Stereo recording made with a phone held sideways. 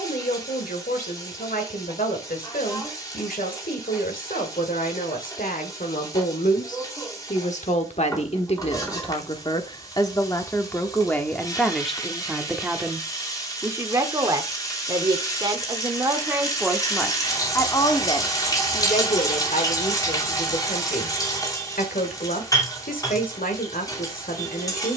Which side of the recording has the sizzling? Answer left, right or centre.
left.